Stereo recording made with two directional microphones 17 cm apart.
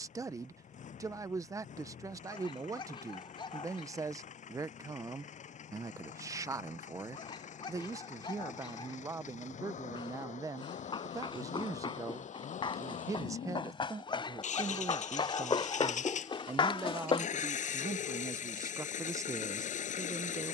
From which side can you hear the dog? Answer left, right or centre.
left.